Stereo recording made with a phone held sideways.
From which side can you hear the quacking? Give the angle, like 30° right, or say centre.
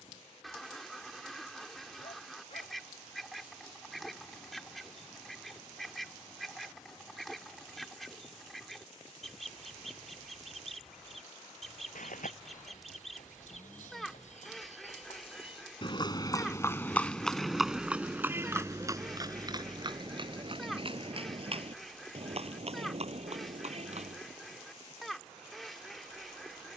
centre.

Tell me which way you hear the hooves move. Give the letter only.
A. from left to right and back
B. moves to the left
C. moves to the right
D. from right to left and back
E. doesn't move
C.